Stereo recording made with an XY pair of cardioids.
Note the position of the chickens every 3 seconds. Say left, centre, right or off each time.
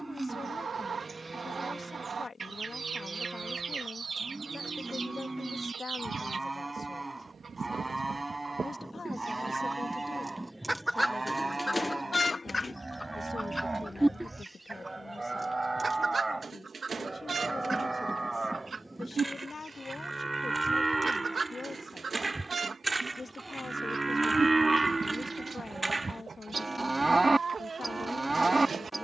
right, right, right, centre, centre, right, right, right, right, right.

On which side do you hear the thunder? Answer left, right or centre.
centre.